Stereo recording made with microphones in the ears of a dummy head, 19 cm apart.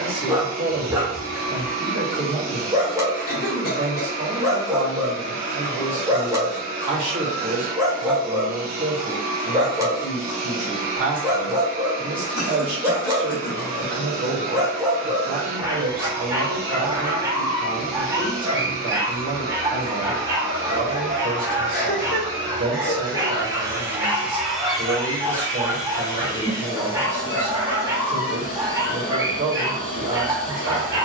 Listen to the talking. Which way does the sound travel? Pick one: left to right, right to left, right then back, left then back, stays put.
stays put.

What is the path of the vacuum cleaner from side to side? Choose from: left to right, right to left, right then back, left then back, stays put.
right to left.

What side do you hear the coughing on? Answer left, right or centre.
left.